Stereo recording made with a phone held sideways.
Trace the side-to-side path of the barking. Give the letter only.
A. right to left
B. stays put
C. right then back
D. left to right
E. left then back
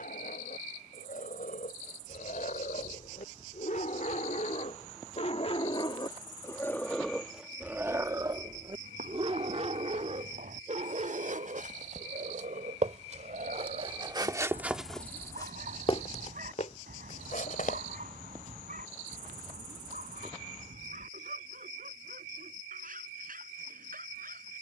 D.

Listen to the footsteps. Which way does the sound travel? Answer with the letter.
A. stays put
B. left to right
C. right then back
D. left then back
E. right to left
E.